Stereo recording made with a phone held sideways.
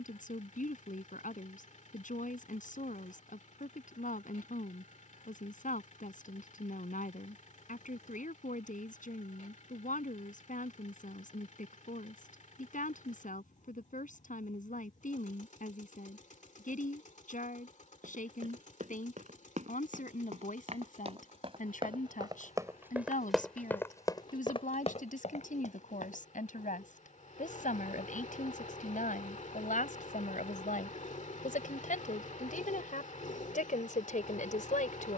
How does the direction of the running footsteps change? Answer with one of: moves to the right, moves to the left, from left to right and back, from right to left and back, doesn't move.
moves to the left.